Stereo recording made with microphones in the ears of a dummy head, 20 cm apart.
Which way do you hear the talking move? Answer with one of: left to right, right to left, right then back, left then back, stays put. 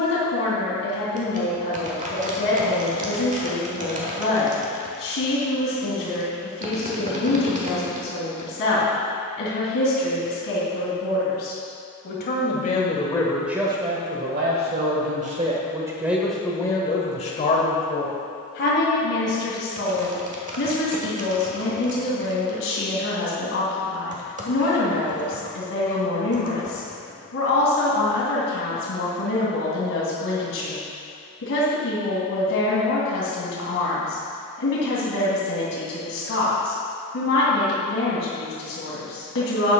right then back.